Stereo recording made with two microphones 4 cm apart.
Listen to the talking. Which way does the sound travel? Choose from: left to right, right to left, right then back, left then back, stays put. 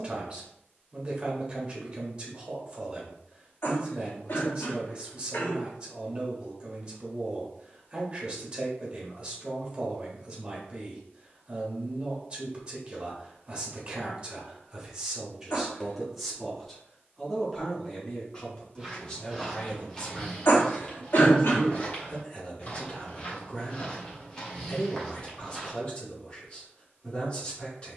right to left.